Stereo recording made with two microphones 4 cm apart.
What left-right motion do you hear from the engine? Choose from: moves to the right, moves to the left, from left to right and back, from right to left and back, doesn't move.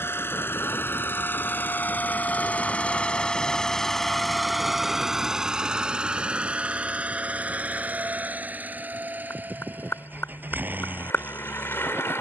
moves to the right.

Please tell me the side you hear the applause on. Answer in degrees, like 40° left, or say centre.
70° left.